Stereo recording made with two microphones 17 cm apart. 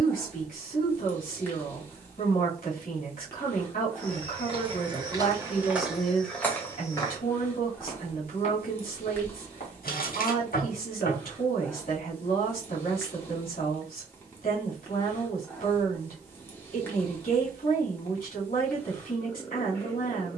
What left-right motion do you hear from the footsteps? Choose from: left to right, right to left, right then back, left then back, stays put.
right to left.